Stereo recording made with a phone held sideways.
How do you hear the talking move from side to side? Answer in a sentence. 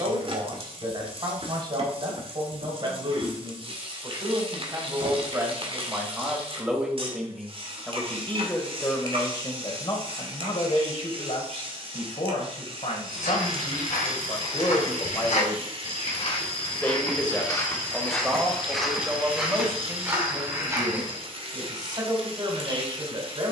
In this clip you hear the talking go left and come back.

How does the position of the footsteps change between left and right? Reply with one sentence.
You can hear the footsteps move to the right.